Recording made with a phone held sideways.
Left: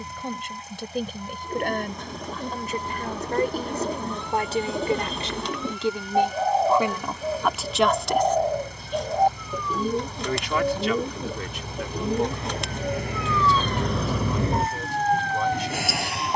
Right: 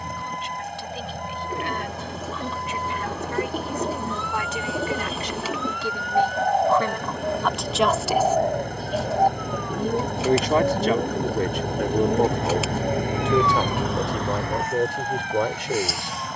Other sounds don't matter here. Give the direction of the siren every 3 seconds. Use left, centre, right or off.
right, right, right, right, centre, left.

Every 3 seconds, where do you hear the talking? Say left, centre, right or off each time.
left, left, centre, right, right, right.